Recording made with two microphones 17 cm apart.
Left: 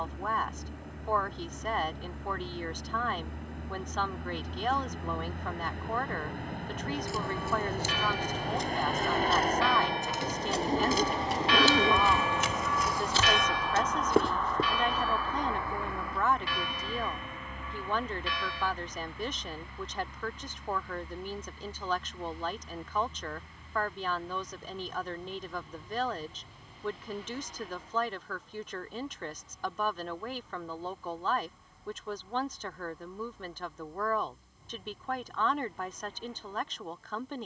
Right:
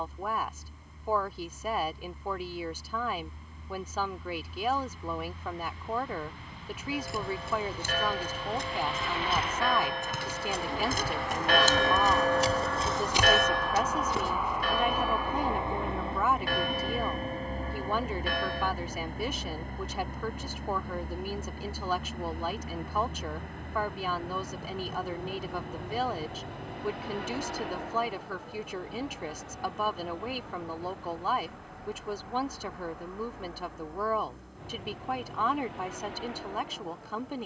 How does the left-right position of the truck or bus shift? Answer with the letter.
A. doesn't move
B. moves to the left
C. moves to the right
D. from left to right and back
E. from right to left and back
C.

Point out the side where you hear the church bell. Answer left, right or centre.
right.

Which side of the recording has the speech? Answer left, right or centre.
centre.